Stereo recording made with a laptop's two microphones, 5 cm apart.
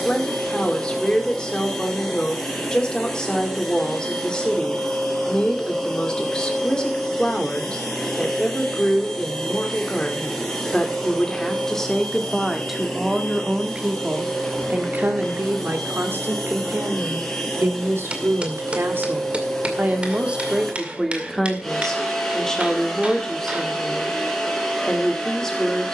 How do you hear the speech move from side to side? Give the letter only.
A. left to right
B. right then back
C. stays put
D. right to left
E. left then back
B.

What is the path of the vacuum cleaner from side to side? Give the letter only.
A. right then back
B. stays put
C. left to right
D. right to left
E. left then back
B.